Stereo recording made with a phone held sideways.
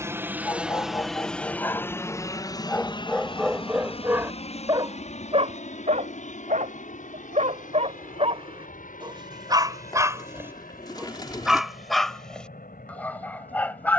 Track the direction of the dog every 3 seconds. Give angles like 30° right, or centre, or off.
20° left, 20° right, 50° right, 20° right, 10° left.